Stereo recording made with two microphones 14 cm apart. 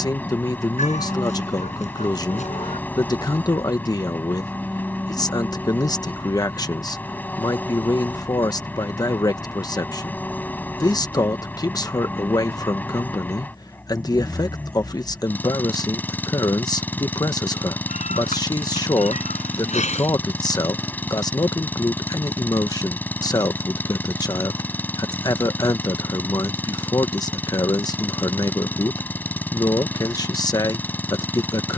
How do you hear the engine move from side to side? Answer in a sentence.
You can hear the engine stay in one place.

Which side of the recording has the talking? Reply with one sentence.
In this clip you hear the talking on the left.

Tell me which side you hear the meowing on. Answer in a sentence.
In this clip you hear the meowing on the left.